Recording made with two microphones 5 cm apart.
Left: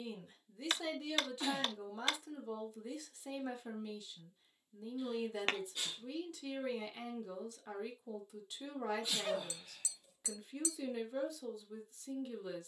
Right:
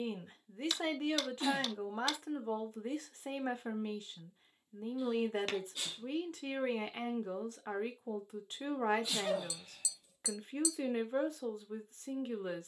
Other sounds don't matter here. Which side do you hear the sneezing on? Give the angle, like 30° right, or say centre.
centre.